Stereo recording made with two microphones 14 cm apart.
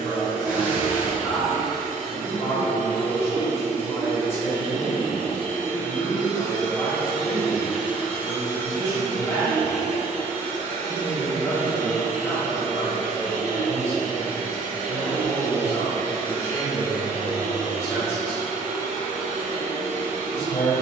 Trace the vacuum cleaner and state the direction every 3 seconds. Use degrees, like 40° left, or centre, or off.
60° right, 30° right, 10° right, 50° right, 60° right, 60° right, 60° right.